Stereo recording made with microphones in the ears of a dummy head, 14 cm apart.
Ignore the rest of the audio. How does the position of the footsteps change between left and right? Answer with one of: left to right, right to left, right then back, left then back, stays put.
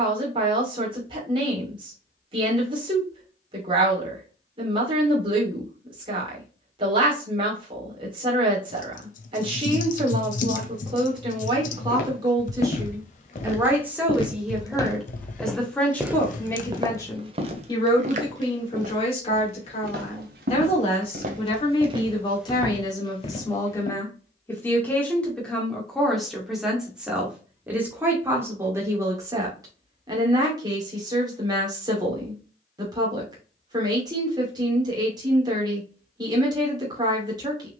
right then back.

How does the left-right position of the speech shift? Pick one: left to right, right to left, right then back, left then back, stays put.
left then back.